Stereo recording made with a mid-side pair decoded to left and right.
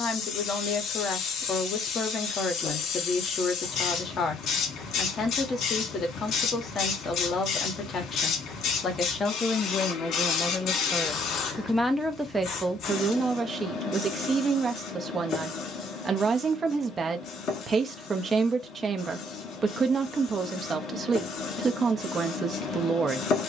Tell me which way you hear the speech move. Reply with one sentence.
In this clip you hear the speech go from the left side to the right.